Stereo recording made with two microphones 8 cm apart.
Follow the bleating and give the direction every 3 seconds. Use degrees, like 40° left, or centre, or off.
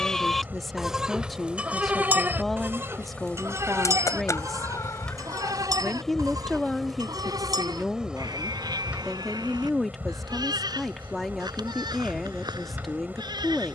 20° right, 50° right, 60° right, 70° right, 70° right.